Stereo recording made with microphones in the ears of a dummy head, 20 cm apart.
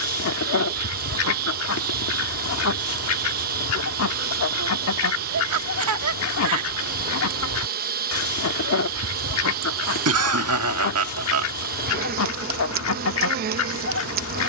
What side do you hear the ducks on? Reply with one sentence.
In this clip you hear the ducks on the left.